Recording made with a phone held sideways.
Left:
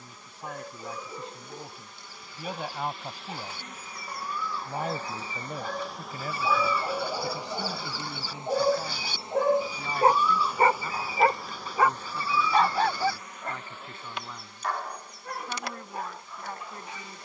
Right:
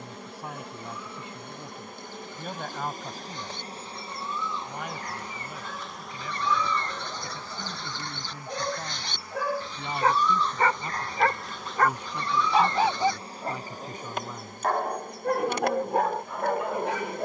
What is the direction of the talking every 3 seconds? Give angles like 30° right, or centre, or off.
centre, 30° left, 20° left, 10° right, 20° right, 20° right.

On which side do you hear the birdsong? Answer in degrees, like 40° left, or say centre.
10° left.